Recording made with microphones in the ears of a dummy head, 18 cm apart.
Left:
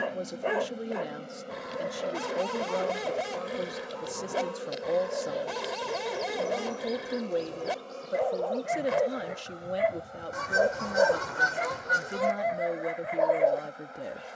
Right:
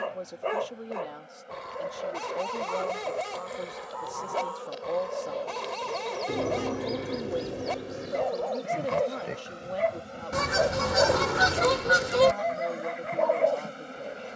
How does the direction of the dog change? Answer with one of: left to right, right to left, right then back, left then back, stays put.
stays put.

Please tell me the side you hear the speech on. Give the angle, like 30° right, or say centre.
20° left.